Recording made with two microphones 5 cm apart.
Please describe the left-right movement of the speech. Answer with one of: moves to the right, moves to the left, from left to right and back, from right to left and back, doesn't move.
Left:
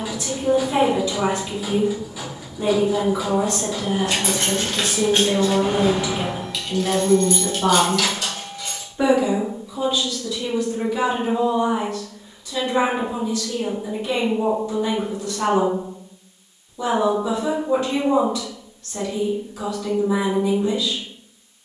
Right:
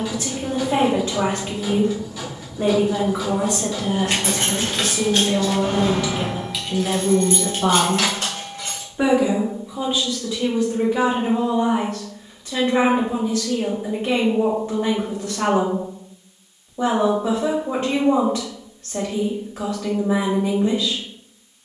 from right to left and back.